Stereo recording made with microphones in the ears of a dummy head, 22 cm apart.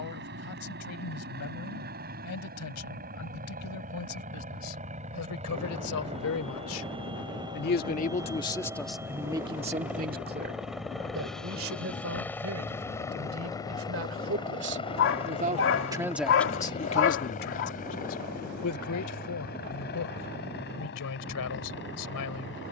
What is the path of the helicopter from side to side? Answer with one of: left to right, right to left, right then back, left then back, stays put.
right to left.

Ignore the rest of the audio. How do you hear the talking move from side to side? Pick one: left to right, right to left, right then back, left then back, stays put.
right then back.